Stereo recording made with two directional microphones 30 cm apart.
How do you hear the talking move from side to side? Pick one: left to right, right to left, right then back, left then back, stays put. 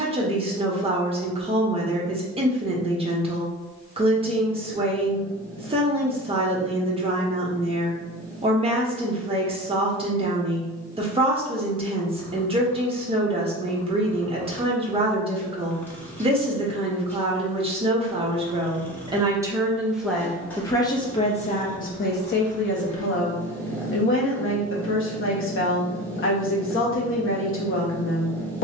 right to left.